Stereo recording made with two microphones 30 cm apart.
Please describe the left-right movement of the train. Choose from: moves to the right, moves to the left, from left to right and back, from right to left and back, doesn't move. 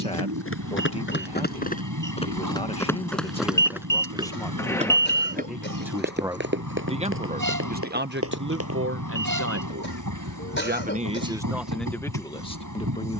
doesn't move.